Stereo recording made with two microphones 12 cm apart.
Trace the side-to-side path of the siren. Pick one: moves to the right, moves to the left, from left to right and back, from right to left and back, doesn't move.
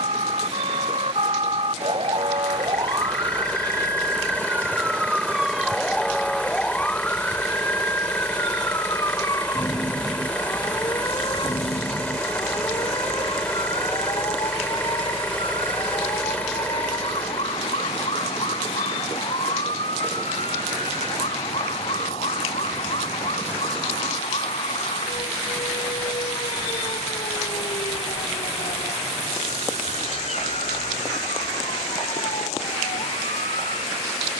moves to the left.